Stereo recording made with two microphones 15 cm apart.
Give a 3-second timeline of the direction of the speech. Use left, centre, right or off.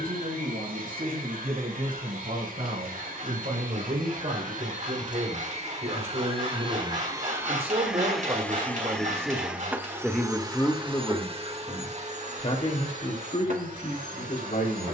right, right, right, centre, left.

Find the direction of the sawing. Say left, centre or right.
right.